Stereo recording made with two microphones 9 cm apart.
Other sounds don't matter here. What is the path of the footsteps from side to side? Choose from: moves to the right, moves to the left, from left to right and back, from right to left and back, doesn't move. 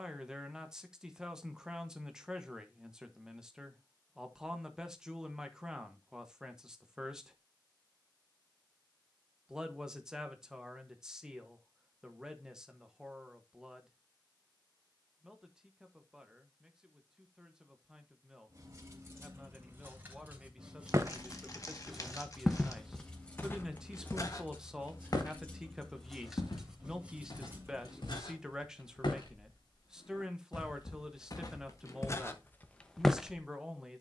from right to left and back.